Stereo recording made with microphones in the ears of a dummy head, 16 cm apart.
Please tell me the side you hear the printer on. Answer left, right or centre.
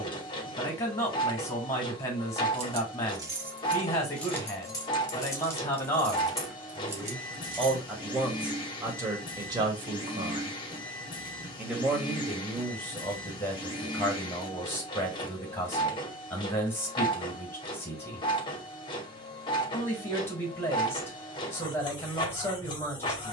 left.